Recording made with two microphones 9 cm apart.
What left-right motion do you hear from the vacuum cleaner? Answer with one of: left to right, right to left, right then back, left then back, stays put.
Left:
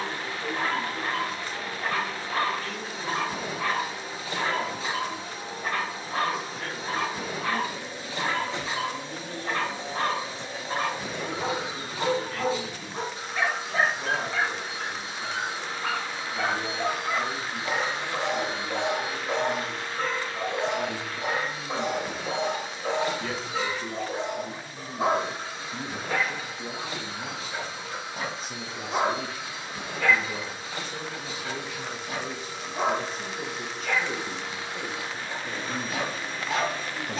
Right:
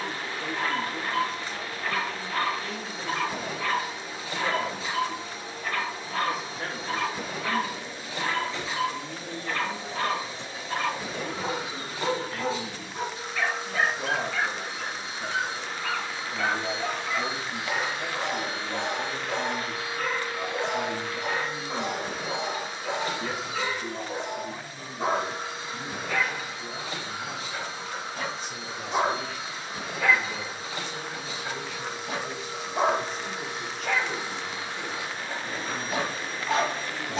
left to right.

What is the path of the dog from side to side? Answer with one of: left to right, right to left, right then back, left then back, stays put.
left to right.